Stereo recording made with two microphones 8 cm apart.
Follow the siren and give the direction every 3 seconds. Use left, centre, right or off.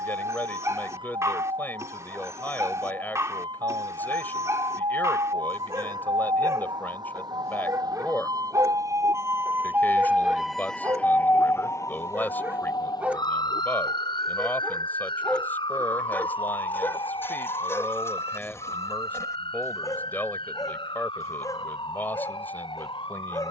right, right, right, centre, left, left, left, left.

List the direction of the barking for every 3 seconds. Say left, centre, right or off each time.
right, right, right, right, centre, left, left, left.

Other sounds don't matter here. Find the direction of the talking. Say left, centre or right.
left.